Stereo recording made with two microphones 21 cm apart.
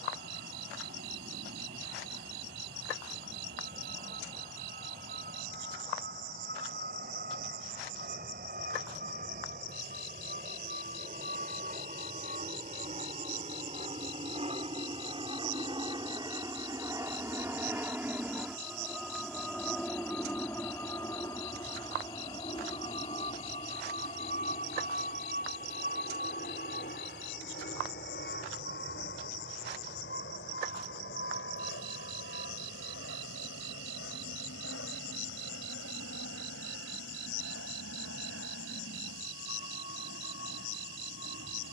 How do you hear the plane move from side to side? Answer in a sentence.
In this clip you hear the plane move to the left.